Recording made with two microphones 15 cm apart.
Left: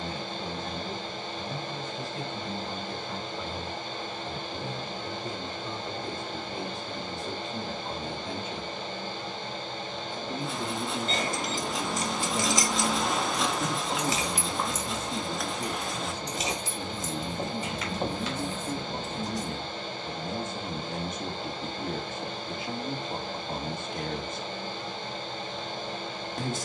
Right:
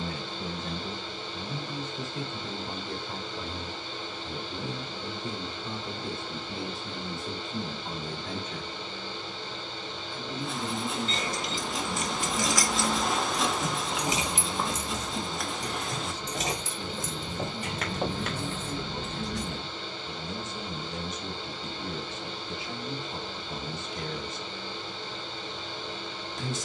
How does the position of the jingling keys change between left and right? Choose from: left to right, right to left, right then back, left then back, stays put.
left to right.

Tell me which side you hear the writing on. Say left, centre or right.
centre.